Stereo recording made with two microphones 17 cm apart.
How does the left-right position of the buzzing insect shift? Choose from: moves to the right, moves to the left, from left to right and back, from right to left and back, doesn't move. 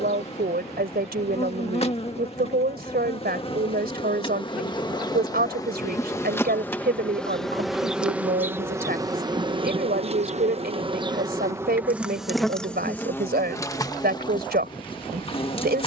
from left to right and back.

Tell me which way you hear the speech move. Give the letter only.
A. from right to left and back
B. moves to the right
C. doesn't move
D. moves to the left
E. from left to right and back
C.